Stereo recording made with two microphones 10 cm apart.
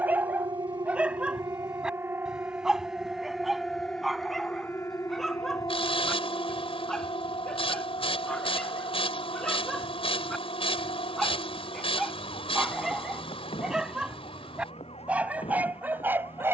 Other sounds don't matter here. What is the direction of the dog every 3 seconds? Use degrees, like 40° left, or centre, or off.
10° right, centre, 10° left, centre, 10° right, 20° right.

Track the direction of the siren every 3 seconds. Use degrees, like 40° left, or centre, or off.
30° right, 20° left, 60° left, 70° left, 80° left, 80° left.